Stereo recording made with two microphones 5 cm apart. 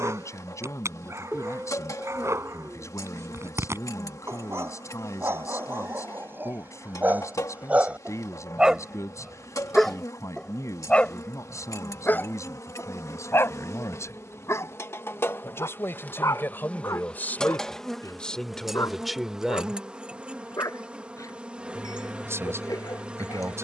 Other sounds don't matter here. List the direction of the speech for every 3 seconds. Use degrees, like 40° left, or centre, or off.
70° left, 70° left, 70° left, 70° left, 60° left, 40° left, centre, 50° right.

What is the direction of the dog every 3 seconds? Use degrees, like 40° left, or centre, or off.
60° right, 50° right, 30° right, 10° left, 50° left, 60° left, 70° left, 80° left.